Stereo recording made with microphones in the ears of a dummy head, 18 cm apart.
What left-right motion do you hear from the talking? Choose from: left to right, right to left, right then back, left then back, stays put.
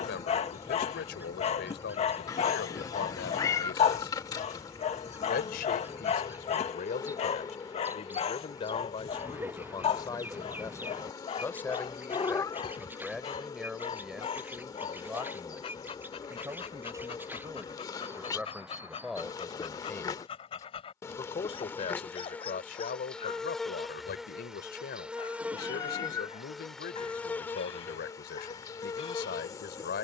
right then back.